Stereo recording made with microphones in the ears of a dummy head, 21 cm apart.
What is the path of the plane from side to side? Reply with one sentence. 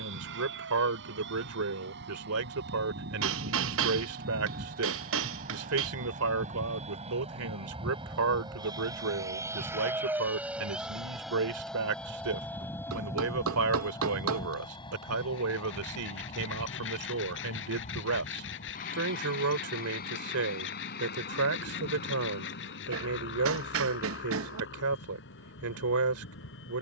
You can hear the plane move from right to left.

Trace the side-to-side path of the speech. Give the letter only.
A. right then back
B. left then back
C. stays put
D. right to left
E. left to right
C.